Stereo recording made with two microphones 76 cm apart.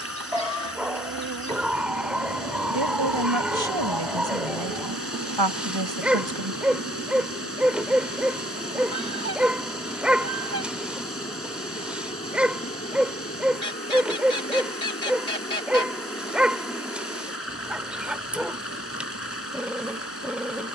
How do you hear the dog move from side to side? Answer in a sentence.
You can hear the dog stay put.